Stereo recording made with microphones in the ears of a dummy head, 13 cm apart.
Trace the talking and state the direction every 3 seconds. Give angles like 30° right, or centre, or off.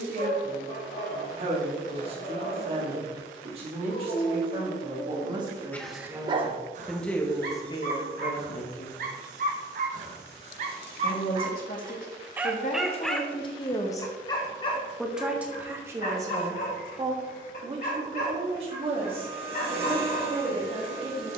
40° right, 40° right, 20° left, 70° left, 40° left, 20° right, 40° right.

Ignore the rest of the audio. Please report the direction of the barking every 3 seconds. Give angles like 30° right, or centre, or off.
60° left, 40° left, 60° right, 50° right, 20° left, 50° left, 60° left.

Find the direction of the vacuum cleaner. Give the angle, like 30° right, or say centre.
80° right.